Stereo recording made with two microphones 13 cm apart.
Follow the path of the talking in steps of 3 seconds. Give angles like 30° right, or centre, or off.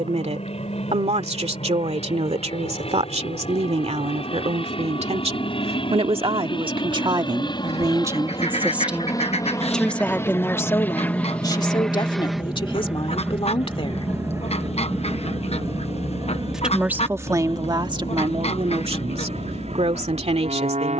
60° right, 60° right, 30° right, 20° left, 50° left, 20° right, 50° right.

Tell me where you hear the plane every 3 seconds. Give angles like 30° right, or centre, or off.
60° left, 50° left, 40° left, 20° left, 10° right, 40° right, 50° right.